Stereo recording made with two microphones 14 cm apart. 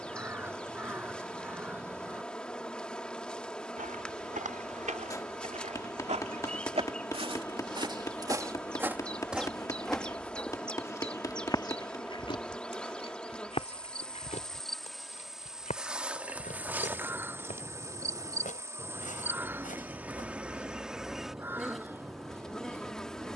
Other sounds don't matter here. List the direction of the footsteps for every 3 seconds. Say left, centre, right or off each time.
off, right, right, centre, left, left, left, off.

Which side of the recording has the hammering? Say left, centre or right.
left.